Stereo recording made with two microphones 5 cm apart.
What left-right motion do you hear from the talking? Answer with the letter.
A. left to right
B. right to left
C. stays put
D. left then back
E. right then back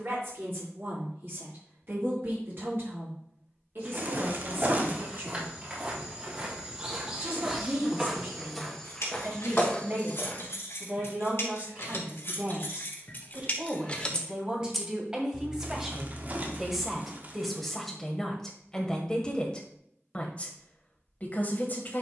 B.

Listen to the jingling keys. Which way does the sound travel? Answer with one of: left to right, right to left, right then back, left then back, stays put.
left to right.